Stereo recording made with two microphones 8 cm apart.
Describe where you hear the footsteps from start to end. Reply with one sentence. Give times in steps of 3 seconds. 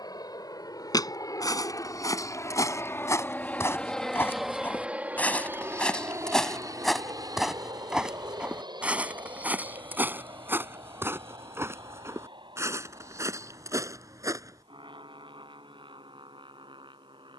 You can hear the footsteps on the left from 0 s, in the centre from 6 s, on the right from 9 s and not at all from 15 s.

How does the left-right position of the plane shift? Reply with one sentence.
You can hear the plane go from the left side to the right.